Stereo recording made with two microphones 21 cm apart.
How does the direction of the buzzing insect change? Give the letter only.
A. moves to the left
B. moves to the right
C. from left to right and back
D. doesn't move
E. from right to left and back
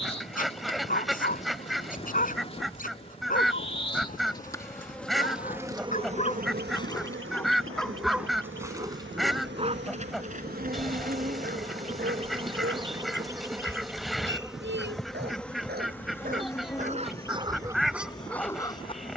C.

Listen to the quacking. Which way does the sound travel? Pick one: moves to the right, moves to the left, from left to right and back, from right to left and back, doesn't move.
doesn't move.